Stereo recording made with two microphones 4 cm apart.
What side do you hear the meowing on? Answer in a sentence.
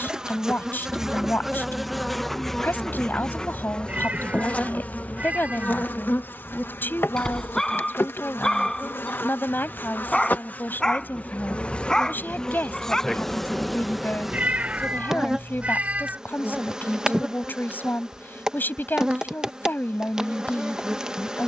You can hear the meowing on the right.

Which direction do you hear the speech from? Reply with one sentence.
You can hear the speech on the left.